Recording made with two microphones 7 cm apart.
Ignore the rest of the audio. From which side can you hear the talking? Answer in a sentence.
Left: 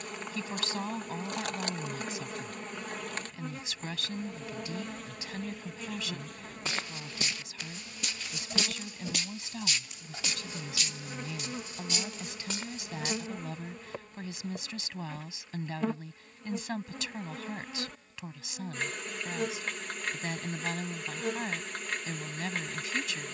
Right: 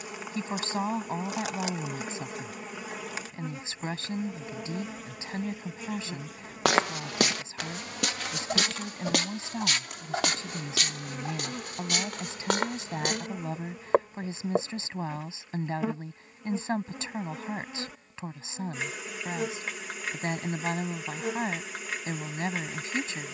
In this clip you hear the talking on the right.